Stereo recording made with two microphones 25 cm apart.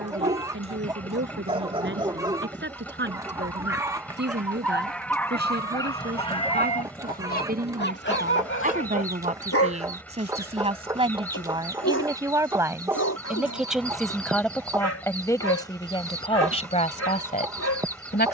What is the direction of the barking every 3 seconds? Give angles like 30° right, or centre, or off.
20° right, centre, 40° left, 70° left, 80° left, 80° left.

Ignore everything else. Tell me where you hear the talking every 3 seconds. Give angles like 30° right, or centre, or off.
50° right, 40° right, 40° right, 20° right, centre, 20° left.